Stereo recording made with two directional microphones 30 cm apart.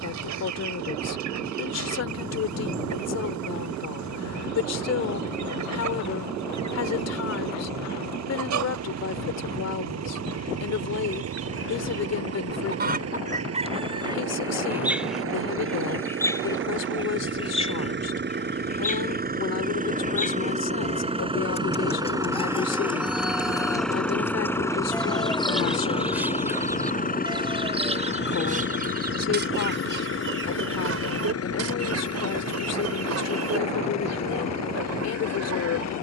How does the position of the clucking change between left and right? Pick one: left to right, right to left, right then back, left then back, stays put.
left then back.